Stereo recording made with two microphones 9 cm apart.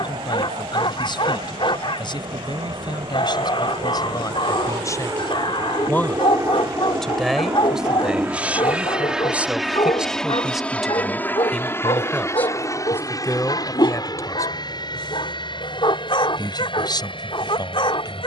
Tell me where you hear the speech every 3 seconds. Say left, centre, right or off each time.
left, left, centre, centre, left, left.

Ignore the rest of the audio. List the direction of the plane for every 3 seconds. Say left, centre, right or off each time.
right, right, right, centre, left, left.